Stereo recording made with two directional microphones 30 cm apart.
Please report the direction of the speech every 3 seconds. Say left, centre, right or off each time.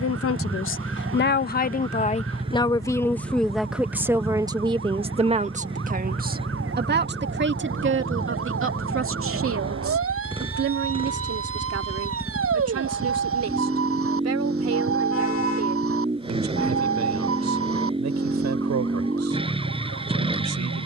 left, centre, right, right, right, right, right.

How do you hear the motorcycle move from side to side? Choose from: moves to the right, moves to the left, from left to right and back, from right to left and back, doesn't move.
doesn't move.